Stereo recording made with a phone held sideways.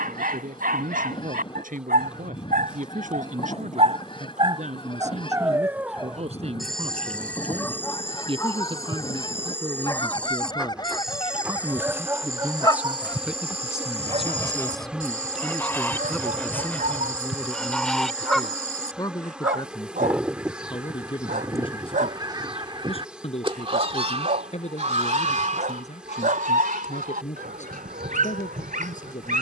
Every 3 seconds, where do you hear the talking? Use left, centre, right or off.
right, right, right, right, centre, centre, left, left, left, left.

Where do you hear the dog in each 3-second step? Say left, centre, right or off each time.
right, right, centre, centre, right, right, right, right, right, right.